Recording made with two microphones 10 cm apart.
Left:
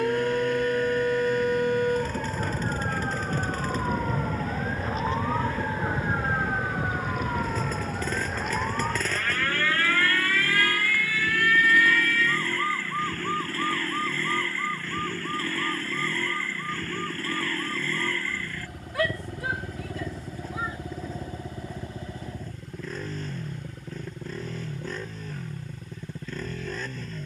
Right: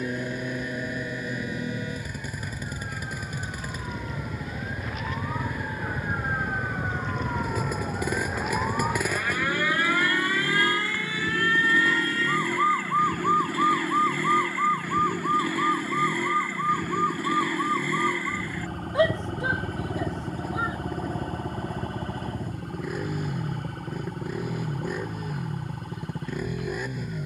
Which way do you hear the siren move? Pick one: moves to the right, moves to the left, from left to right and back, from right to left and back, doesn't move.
moves to the right.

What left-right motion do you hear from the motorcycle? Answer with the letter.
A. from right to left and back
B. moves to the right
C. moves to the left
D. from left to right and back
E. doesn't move
E.